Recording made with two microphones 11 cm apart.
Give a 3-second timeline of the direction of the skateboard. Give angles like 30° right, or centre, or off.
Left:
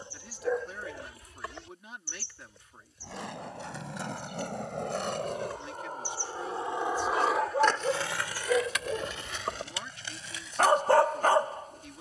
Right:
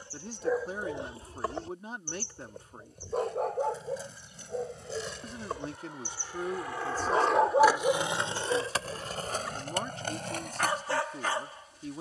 off, 70° left, centre, 50° right.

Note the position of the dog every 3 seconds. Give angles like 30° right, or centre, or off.
30° right, 60° right, 10° right, 50° left.